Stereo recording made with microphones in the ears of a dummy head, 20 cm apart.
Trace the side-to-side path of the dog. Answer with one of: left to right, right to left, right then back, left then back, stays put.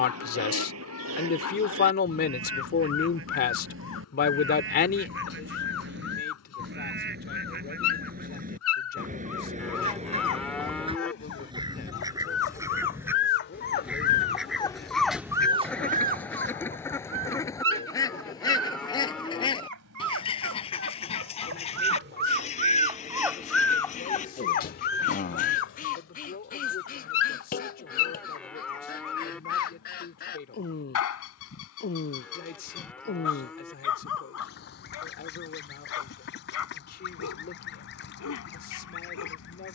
right then back.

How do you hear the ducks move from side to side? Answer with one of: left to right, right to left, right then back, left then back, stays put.
right to left.